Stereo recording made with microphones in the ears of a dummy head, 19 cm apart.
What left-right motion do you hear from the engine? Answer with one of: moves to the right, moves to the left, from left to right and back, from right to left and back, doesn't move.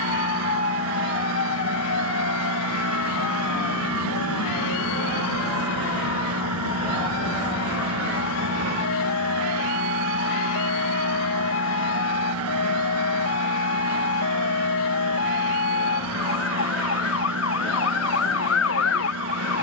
doesn't move.